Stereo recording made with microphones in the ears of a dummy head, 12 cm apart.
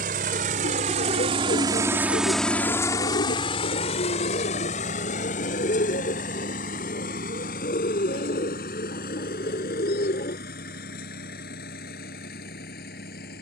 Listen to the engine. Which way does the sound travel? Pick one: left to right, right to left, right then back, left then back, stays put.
right to left.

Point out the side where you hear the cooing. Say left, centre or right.
left.